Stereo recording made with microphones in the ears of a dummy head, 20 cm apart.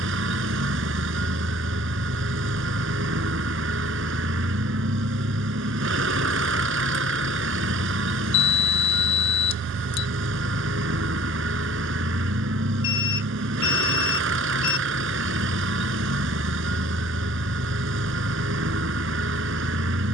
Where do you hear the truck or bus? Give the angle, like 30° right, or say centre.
60° right.